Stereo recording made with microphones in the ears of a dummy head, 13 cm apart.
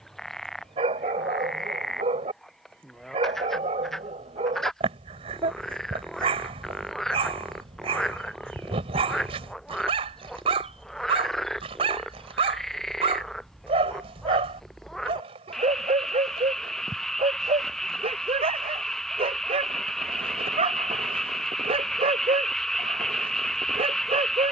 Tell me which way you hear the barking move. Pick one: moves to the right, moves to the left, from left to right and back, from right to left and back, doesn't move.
doesn't move.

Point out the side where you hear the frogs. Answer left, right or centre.
centre.